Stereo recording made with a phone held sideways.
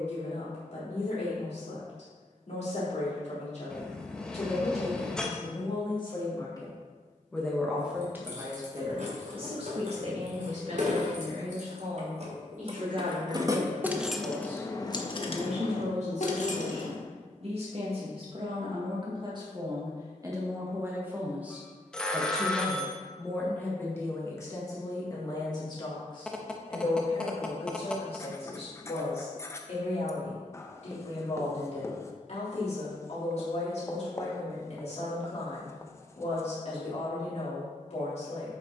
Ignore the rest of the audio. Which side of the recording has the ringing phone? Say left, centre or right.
centre.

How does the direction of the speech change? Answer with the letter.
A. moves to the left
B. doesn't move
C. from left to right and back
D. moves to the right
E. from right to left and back
C.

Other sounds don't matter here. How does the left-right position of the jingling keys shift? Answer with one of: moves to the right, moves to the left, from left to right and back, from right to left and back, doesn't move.
moves to the left.